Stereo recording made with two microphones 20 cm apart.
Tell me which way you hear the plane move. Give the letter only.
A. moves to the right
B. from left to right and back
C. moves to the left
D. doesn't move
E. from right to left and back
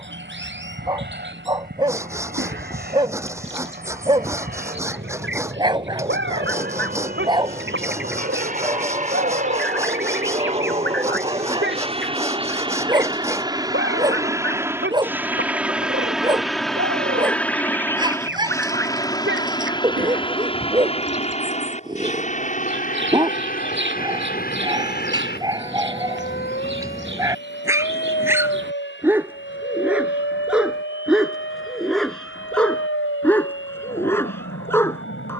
C.